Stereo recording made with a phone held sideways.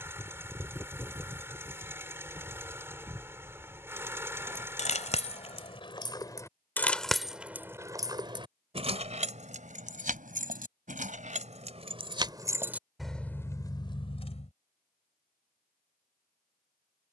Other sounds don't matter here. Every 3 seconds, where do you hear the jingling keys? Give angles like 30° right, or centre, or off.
off, 40° left, 10° right, 50° right, 10° left, off.